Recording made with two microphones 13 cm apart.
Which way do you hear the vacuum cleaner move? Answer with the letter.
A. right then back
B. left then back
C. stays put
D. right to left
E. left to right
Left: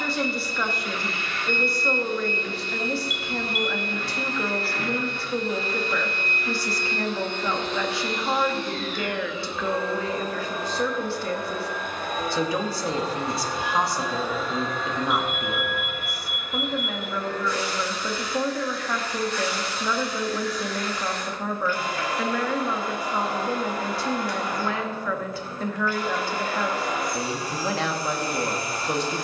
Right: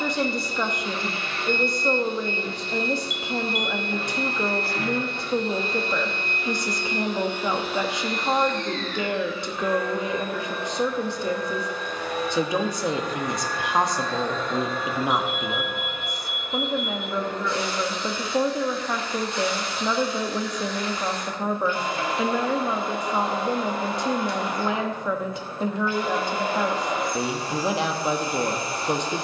B.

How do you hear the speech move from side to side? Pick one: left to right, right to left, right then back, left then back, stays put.
stays put.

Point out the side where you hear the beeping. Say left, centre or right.
left.